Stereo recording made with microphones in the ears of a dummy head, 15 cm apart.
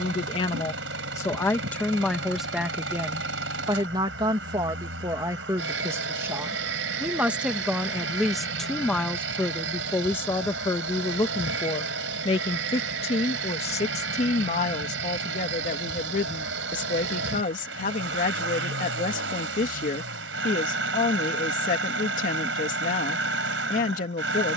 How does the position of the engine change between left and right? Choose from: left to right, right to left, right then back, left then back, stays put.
stays put.